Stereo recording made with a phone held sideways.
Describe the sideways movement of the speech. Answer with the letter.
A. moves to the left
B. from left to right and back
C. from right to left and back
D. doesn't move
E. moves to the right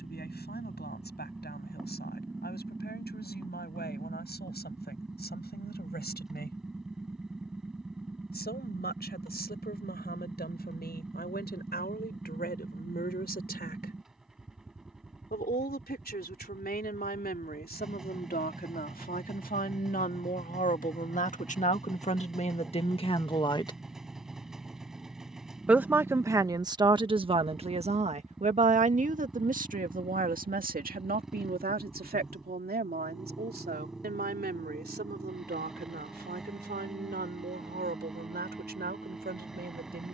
E.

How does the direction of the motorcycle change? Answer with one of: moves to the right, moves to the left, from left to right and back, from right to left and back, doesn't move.
doesn't move.